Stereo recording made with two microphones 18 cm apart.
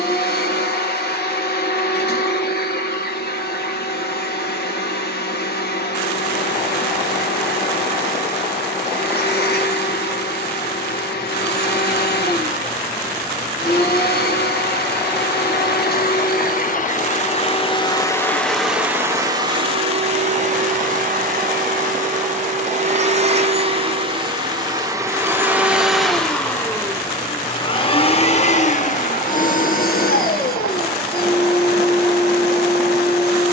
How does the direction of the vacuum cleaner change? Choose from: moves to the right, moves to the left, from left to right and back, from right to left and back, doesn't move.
from left to right and back.